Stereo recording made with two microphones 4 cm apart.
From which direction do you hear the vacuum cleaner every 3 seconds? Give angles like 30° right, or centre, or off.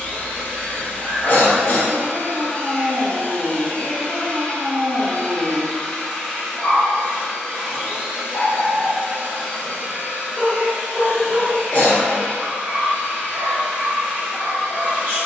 30° left, 20° left, 10° right, 40° right, 40° right.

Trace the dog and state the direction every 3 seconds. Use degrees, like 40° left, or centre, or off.
40° right, 40° right, centre, 20° left, 30° right.